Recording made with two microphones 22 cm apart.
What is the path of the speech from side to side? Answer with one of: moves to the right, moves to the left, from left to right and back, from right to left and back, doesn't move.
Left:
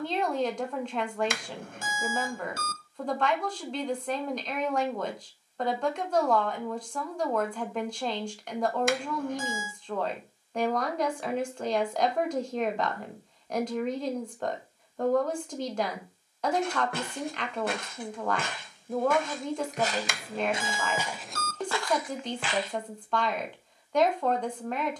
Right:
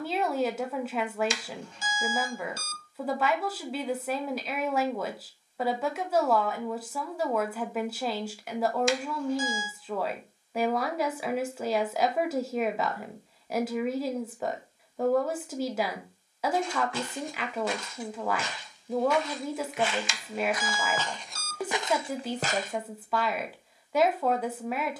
doesn't move.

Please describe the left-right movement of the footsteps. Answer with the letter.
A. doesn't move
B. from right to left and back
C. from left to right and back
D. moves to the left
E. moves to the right
E.